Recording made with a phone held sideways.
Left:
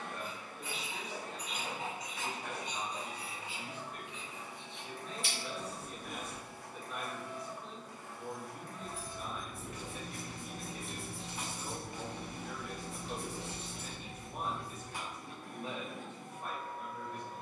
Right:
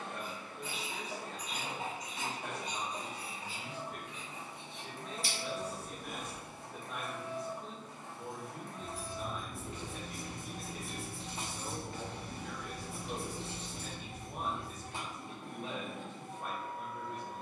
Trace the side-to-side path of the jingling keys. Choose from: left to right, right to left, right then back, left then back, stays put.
left then back.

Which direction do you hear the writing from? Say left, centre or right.
right.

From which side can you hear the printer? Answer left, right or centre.
right.